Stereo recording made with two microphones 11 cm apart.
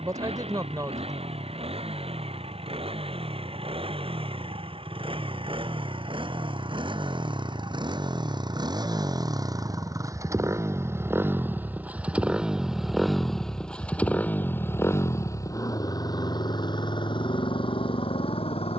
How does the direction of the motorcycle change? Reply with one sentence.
You can hear the motorcycle travel towards the left.